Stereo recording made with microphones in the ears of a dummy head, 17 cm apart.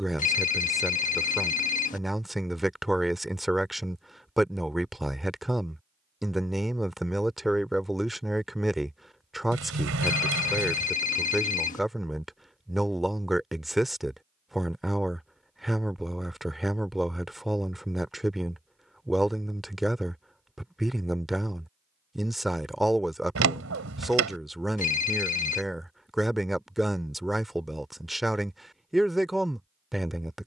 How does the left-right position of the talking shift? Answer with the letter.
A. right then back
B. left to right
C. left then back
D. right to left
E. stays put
E.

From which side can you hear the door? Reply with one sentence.
You can hear the door on the right.